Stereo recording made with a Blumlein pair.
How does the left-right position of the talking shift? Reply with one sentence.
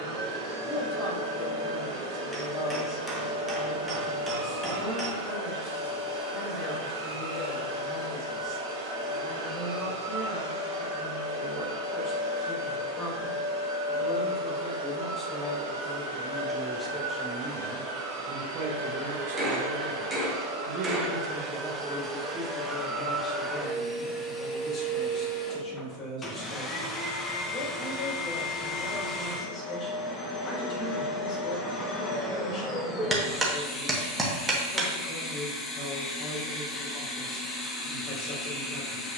You can hear the talking go right and come back.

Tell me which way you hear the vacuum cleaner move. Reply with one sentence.
In this clip you hear the vacuum cleaner go from the right side to the left.